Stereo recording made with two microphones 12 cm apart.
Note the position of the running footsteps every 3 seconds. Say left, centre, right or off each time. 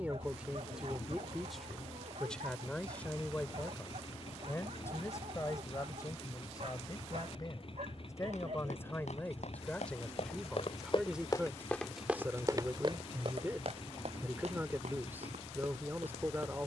off, off, left, left, right, right.